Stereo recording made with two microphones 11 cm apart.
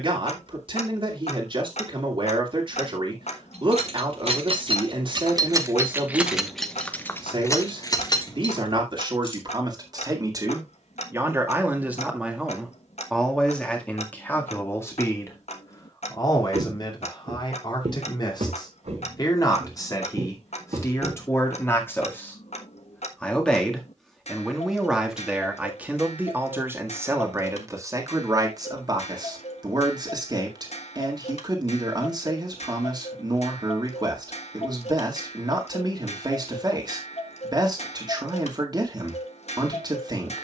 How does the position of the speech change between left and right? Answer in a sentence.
In this clip you hear the speech move from right to left and back again.